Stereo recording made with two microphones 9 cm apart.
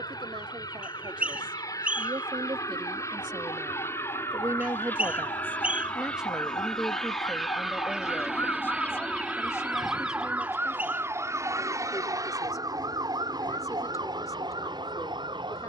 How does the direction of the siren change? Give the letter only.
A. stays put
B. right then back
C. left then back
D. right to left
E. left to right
E.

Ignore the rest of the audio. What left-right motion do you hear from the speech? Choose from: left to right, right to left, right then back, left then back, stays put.
right to left.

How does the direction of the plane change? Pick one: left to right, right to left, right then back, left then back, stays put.
left to right.